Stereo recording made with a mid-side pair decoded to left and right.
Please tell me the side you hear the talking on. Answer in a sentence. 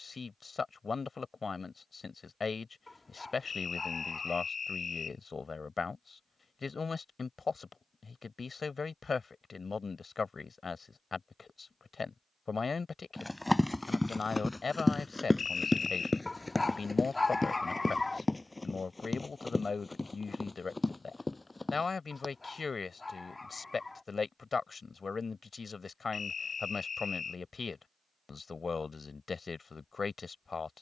You can hear the talking on the left.